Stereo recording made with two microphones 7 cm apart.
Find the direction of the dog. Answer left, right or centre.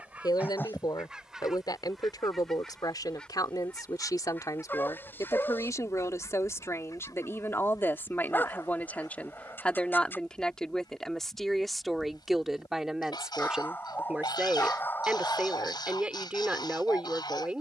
left.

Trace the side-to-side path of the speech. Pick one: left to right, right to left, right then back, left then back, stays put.
left to right.